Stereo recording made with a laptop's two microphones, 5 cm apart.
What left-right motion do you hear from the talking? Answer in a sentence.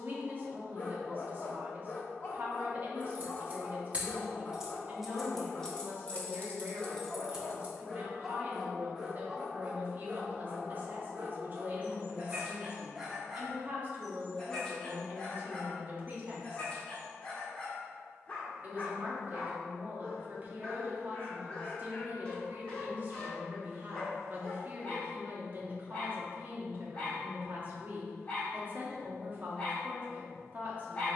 In this clip you hear the talking stay put.